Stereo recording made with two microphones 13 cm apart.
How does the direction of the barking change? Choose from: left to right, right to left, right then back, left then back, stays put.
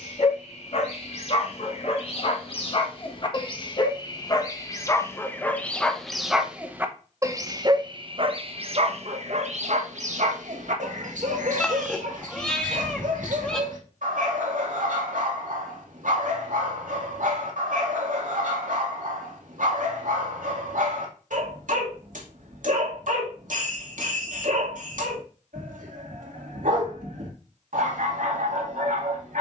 left to right.